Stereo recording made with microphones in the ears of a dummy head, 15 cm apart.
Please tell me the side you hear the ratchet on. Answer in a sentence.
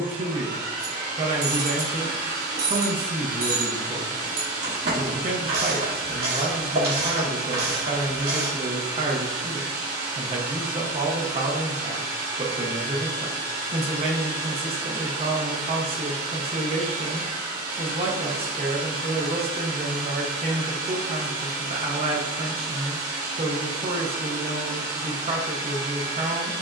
You can hear the ratchet on the right.